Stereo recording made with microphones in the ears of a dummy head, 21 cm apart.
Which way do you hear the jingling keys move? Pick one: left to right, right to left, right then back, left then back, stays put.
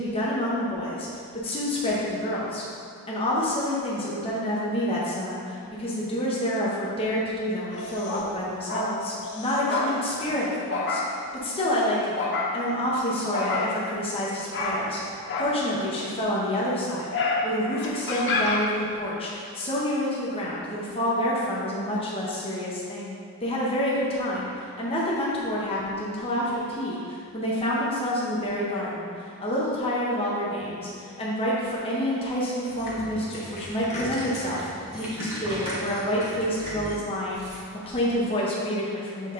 left to right.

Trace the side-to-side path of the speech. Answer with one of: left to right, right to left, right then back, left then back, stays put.
stays put.